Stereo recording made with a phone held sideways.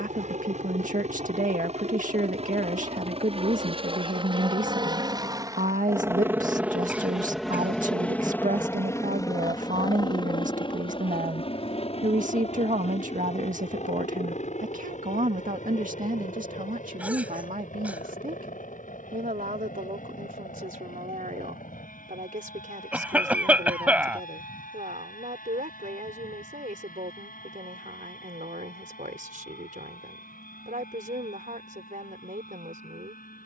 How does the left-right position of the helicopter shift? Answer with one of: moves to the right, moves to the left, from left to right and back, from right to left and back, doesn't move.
moves to the left.